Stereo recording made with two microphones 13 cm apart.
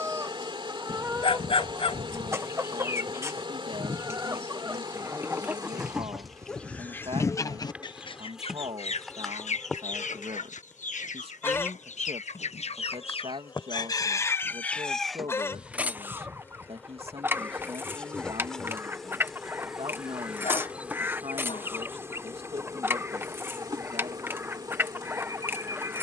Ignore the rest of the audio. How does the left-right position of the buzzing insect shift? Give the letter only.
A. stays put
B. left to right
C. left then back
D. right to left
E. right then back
C.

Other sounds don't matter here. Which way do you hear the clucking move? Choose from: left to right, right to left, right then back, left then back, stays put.
left then back.